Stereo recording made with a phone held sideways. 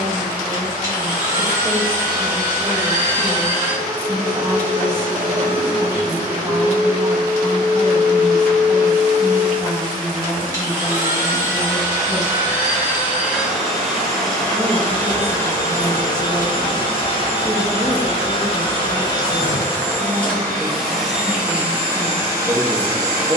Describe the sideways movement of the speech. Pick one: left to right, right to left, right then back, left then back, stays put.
stays put.